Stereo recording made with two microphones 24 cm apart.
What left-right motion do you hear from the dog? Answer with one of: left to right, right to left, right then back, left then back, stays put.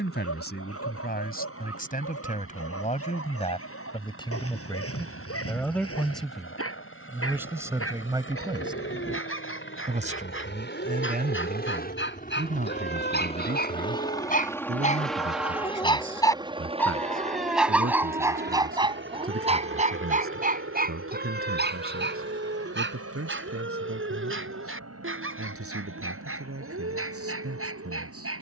left to right.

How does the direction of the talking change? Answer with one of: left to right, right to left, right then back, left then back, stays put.
left to right.